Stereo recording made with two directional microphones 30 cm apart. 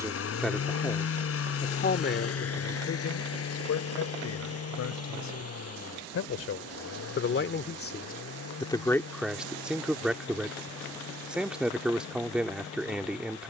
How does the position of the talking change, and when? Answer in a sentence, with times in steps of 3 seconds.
In this clip you hear the talking on the left from 0 s and in the centre from 9 s.